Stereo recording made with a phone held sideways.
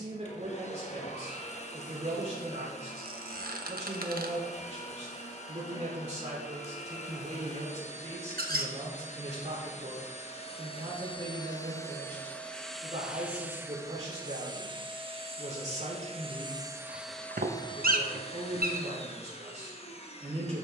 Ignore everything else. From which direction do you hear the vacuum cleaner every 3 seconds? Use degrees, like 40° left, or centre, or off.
40° left, 40° left, 40° left, 40° left, 10° right, 10° right, 40° left.